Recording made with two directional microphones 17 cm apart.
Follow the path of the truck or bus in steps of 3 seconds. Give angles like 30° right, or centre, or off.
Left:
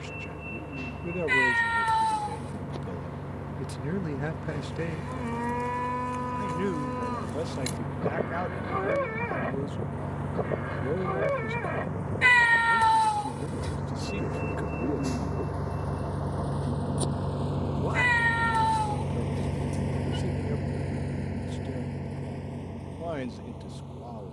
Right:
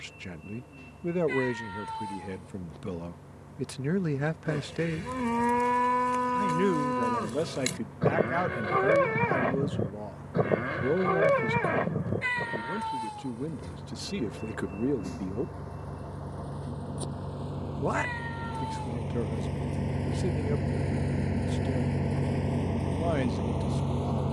70° left, 60° left, 60° left, 60° left, 50° left, 40° left, 10° left, 40° right.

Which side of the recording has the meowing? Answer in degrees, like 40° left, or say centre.
60° left.